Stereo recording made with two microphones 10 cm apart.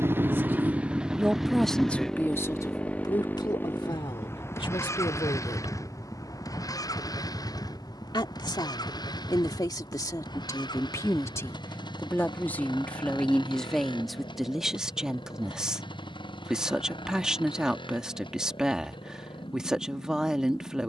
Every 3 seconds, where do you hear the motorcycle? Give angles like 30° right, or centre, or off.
centre, 30° left, 40° left, 50° left, 50° left, 50° left, 60° left.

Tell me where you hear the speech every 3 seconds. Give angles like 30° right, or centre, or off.
10° left, 60° left, 50° left, 40° left, 10° left, 10° right, 10° right.